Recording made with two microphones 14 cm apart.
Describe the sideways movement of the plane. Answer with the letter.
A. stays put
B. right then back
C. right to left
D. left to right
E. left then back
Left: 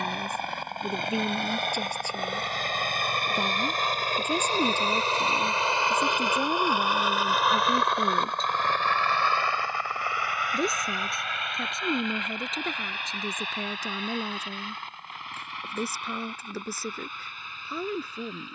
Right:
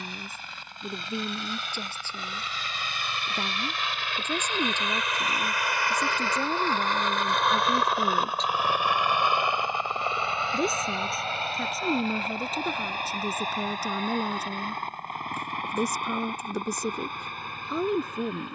D.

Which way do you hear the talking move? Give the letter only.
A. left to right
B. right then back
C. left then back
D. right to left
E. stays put
A.